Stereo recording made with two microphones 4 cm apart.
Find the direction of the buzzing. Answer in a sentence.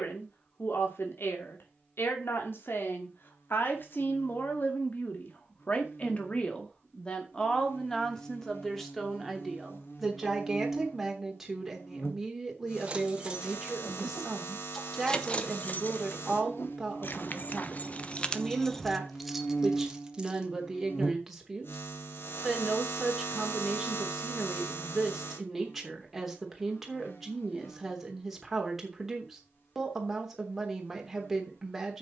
You can hear the buzzing on the left.